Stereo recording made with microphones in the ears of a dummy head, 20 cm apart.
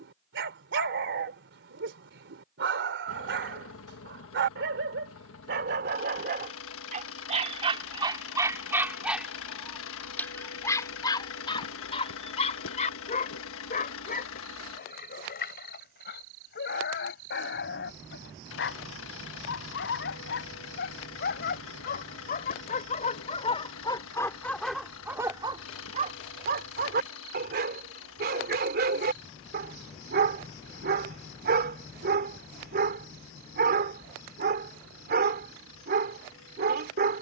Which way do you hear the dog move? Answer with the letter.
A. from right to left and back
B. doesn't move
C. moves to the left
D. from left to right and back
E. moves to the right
A.